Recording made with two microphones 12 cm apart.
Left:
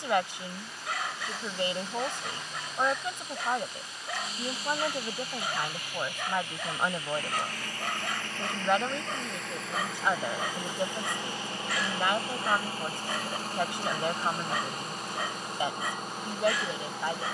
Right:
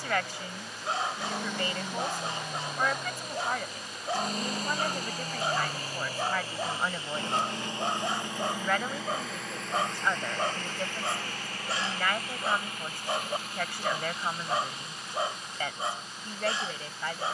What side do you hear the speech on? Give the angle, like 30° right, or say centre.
20° left.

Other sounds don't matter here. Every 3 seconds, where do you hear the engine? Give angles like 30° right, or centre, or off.
60° right, 50° right, 20° right, 10° left, 40° left, 50° left.